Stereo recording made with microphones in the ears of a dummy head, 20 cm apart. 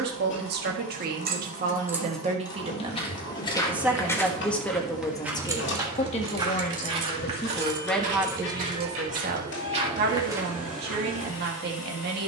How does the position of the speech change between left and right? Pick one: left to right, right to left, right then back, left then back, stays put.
left then back.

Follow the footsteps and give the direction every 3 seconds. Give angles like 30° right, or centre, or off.
30° left, centre, 30° right, 10° right.